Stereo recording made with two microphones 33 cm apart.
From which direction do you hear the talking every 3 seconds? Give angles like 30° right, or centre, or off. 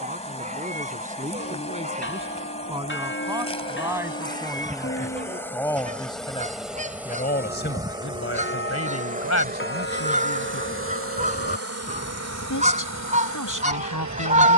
20° right, centre, 30° left, 60° left, 70° left.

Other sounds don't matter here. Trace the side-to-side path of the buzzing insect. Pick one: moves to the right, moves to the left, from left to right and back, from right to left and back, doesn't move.
moves to the right.